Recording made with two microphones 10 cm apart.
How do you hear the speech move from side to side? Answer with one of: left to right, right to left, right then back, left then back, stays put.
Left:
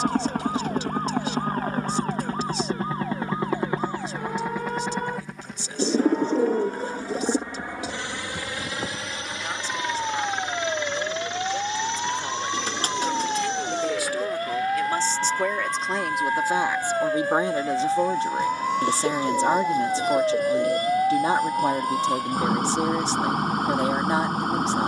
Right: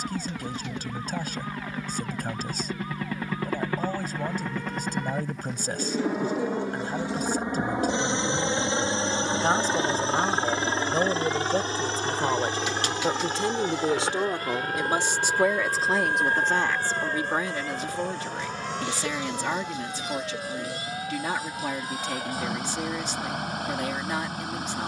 right to left.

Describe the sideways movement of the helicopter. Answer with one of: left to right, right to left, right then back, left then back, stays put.
left to right.